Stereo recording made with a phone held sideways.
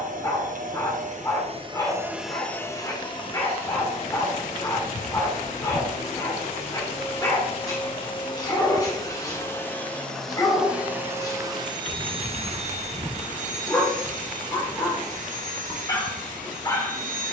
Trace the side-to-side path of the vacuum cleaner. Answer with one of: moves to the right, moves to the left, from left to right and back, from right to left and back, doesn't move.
from right to left and back.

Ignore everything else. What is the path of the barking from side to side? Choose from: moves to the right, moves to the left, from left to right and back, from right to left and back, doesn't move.
doesn't move.